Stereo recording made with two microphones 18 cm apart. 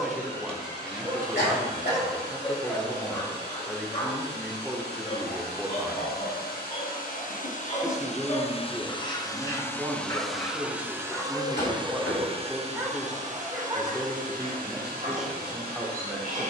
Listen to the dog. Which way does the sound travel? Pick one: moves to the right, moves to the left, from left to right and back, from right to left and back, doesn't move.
from right to left and back.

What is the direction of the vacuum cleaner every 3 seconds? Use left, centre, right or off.
left, left, left, centre, right, right.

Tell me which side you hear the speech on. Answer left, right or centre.
centre.